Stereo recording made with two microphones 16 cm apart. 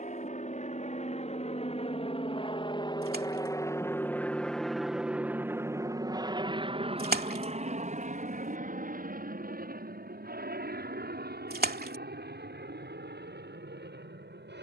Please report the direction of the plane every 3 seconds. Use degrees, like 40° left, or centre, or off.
40° left, centre, 40° right, 60° right, 70° right.